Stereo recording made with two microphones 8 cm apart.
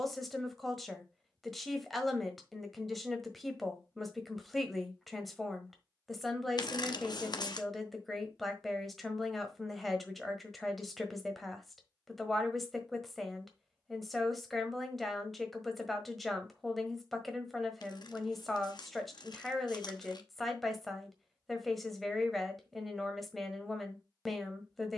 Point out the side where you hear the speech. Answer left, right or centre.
centre.